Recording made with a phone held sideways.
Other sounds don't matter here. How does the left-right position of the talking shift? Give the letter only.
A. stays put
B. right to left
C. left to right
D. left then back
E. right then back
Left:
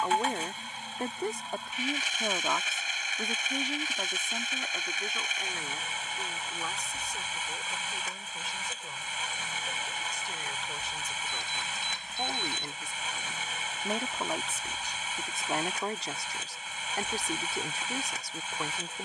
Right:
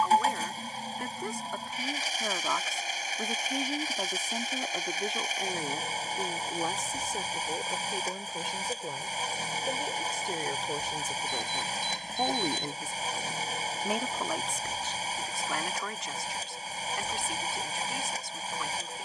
E.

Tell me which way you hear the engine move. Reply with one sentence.
In this clip you hear the engine stay put.